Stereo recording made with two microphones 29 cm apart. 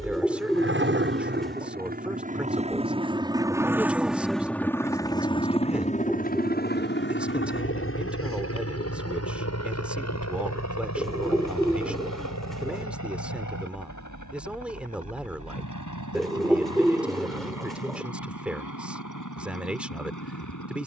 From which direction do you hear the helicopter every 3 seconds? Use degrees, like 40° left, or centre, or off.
30° right, centre, 40° left, 60° left, 70° left, 70° left, 80° left.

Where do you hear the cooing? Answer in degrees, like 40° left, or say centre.
centre.